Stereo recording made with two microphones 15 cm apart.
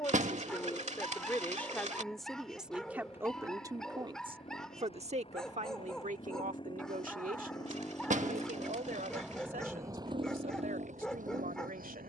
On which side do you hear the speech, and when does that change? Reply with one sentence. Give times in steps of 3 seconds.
In this clip you hear the speech in the centre from 0 s and on the right from 3 s.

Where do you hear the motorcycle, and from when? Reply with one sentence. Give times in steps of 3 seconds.
You can hear the motorcycle on the left from 0 s and on the right from 9 s.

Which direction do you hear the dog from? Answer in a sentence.
In this clip you hear the dog in the centre.